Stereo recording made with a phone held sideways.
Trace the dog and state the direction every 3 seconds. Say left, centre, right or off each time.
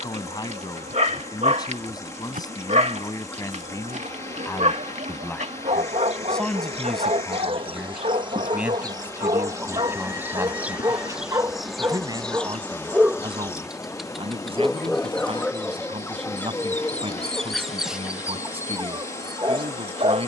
right, right, right, right, centre, centre, right.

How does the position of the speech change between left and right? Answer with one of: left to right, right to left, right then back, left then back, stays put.
left to right.